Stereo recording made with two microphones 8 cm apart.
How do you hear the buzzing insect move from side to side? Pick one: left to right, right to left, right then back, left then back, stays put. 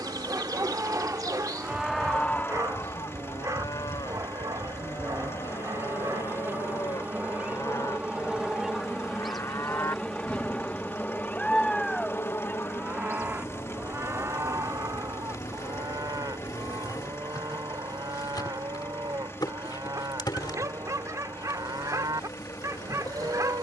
right to left.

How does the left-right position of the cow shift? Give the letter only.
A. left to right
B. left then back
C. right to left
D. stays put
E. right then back
B.